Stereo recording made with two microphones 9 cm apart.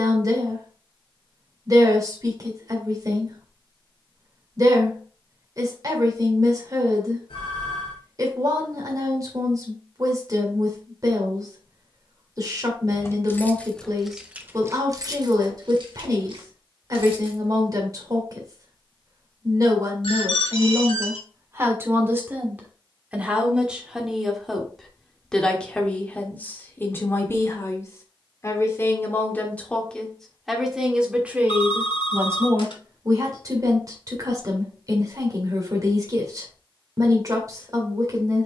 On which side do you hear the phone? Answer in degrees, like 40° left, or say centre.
70° left.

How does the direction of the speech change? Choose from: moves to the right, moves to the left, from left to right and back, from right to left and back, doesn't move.
from right to left and back.